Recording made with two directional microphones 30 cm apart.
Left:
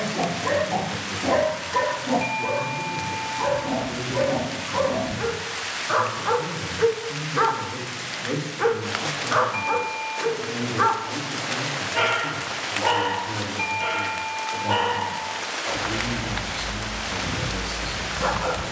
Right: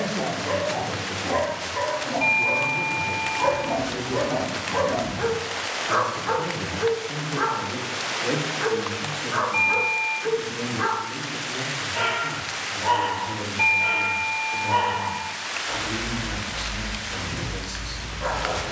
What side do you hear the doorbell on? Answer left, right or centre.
centre.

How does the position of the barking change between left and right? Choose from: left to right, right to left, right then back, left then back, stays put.
right then back.